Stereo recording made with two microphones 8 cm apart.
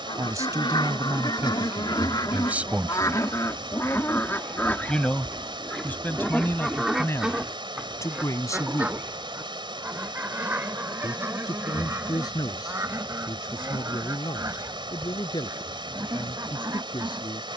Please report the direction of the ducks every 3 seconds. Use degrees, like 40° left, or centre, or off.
60° left, 20° left, 10° right, 30° right, 30° right, 40° right.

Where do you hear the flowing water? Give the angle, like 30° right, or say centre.
70° right.